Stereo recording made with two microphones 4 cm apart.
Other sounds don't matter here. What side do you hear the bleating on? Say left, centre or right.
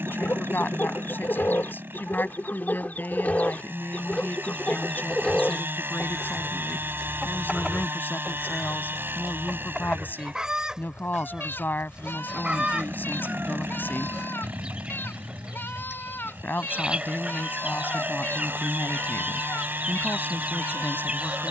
left.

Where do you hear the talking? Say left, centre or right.
left.